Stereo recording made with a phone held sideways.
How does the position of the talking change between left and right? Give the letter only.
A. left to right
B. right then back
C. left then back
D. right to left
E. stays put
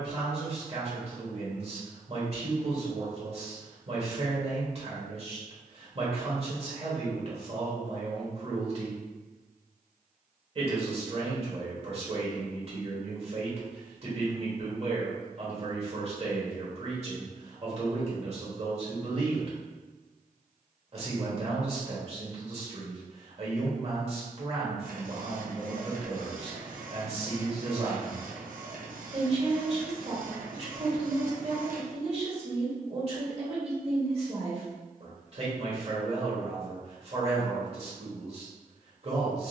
E.